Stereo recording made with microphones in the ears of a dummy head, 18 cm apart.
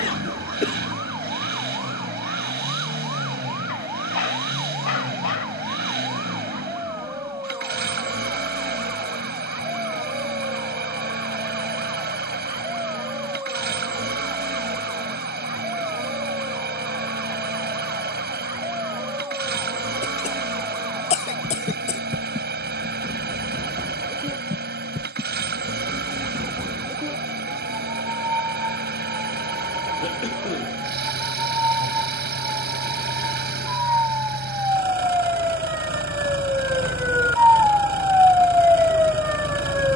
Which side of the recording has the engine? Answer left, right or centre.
right.